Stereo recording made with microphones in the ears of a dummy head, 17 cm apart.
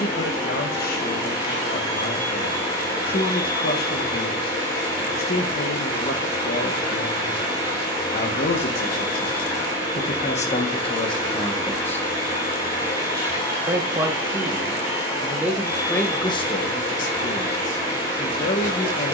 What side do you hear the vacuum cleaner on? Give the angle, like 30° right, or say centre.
30° left.